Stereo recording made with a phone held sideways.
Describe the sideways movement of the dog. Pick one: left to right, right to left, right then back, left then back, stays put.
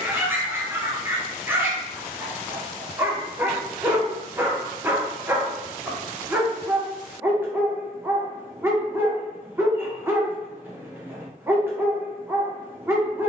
stays put.